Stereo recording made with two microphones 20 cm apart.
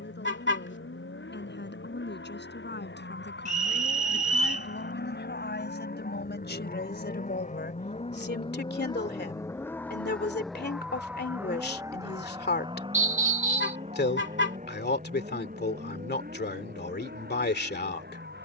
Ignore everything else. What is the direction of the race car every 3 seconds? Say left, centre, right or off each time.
left, left, left, centre, right, right.